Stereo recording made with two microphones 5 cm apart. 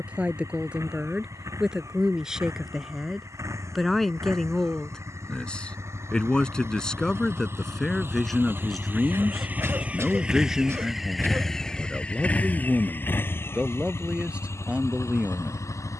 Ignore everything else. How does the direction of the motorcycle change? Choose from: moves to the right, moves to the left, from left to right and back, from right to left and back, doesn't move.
moves to the left.